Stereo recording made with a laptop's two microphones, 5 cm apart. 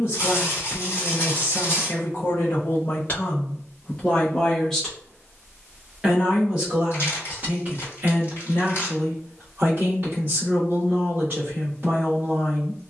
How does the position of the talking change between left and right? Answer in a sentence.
You can hear the talking go from the left side to the right.